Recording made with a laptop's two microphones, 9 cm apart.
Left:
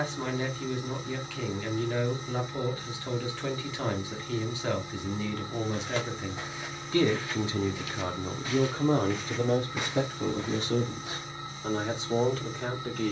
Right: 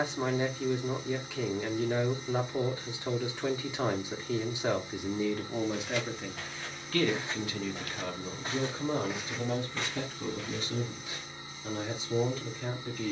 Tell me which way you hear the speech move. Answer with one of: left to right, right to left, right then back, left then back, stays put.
right to left.